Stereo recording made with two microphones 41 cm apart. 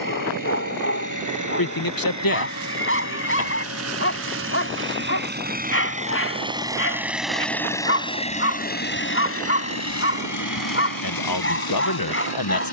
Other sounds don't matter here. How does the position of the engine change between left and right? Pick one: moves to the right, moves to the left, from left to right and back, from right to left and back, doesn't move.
moves to the left.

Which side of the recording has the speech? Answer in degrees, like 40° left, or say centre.
60° left.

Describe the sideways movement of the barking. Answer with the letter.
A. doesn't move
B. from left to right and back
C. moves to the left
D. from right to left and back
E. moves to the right
A.